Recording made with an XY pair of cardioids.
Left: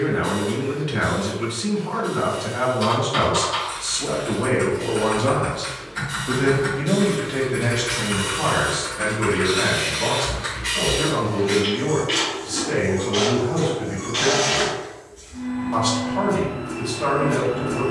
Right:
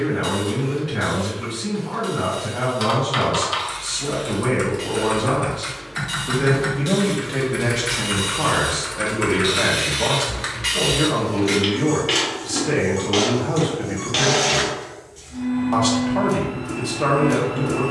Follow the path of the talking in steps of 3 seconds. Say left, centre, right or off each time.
left, left, centre, right, right, right.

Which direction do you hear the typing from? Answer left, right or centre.
right.